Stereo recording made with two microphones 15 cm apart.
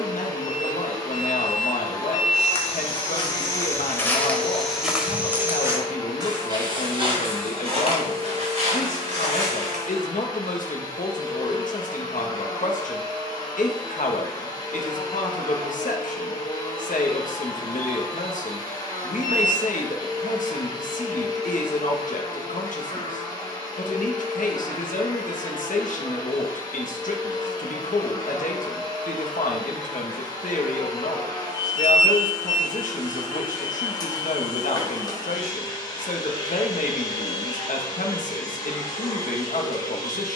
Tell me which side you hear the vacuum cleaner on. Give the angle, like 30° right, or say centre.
30° left.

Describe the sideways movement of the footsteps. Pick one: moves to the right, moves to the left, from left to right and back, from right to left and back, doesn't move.
moves to the right.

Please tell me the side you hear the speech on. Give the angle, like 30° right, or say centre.
60° left.